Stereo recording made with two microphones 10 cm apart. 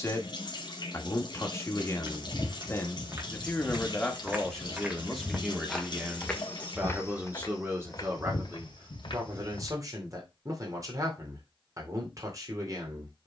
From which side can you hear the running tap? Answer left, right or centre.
left.